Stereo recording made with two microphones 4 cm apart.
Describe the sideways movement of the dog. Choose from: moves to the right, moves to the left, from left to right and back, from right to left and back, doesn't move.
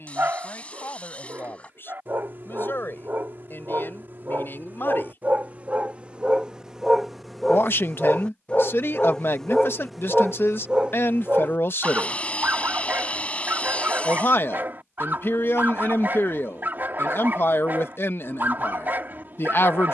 from right to left and back.